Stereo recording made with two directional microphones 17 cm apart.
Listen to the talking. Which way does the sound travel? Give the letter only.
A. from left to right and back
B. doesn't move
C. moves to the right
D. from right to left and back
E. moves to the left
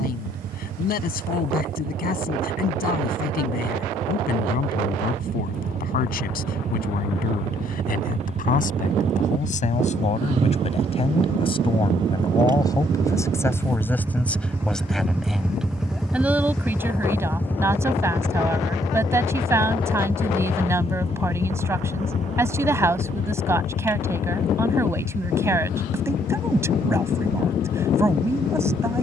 C.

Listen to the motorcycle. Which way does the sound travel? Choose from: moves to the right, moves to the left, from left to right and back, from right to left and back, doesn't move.
moves to the left.